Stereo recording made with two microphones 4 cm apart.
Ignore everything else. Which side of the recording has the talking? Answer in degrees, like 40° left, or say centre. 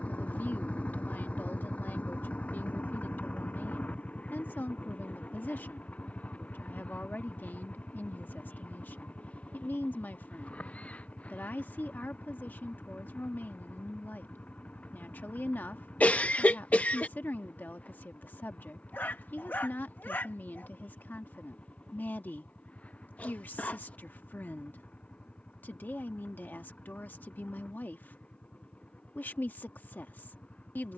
50° left.